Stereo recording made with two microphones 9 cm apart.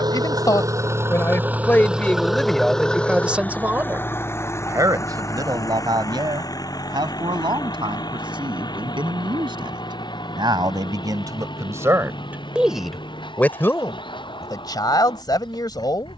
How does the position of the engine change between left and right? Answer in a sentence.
In this clip you hear the engine travel towards the left.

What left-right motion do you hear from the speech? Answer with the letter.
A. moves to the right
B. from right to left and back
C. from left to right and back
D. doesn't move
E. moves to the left
C.